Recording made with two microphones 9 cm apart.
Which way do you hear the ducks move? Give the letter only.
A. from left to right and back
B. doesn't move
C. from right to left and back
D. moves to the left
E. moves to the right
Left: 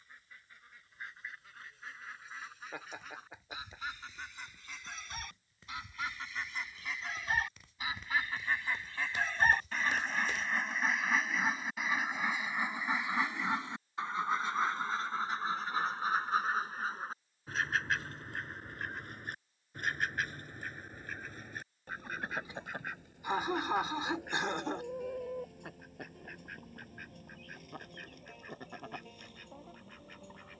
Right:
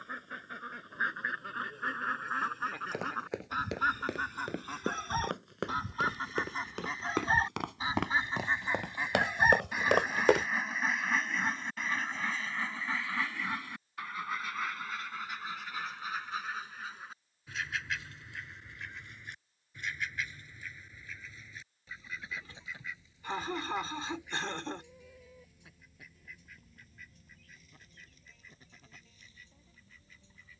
D.